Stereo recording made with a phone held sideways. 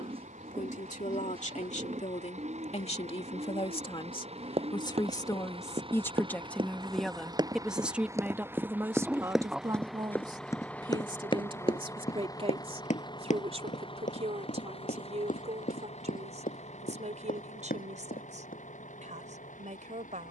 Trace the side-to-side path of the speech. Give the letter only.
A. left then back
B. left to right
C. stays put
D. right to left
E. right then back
B.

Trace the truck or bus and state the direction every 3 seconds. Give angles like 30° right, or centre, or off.
60° right, 50° right, 30° right, 10° left, 40° left, 50° left, 60° left.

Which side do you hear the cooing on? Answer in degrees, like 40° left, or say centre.
40° right.